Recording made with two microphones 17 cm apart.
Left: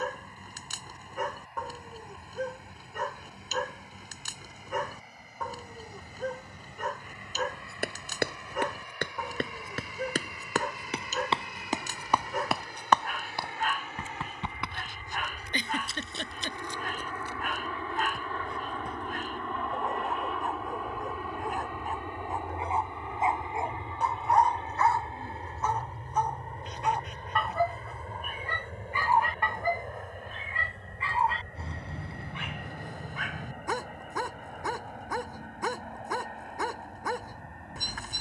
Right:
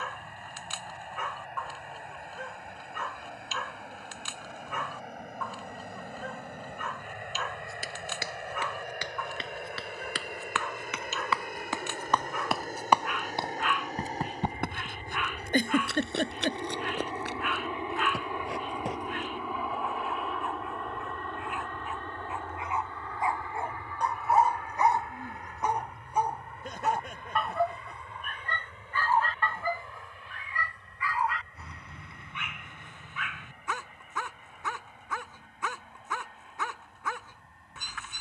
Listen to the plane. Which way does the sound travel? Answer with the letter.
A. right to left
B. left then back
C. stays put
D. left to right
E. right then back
A.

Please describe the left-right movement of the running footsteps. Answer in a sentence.
You can hear the running footsteps move to the right.